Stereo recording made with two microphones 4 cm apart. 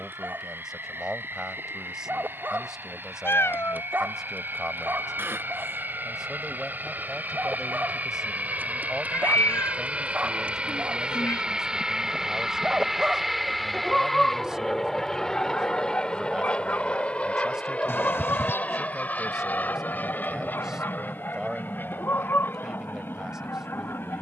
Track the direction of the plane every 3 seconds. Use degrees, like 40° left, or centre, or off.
70° right, 60° right, 50° right, 30° right, centre, 20° left, 40° left, 50° left.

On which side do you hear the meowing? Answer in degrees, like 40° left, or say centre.
80° left.